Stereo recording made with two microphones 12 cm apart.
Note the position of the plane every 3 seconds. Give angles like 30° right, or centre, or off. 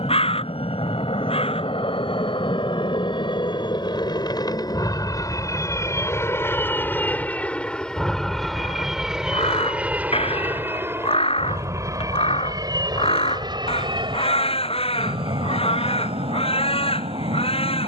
50° left, 30° left, 10° left, 10° right, 30° right, 40° right.